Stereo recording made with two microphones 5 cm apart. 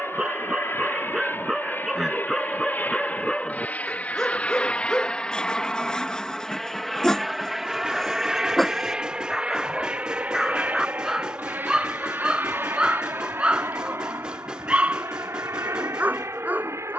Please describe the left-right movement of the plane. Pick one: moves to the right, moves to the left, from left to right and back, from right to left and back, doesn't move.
moves to the right.